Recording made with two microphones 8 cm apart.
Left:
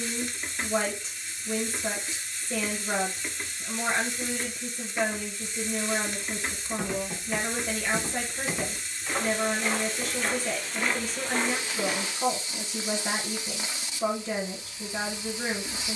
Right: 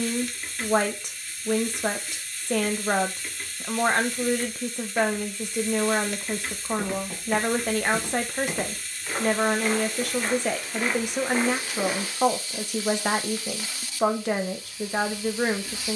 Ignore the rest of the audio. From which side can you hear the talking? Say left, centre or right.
right.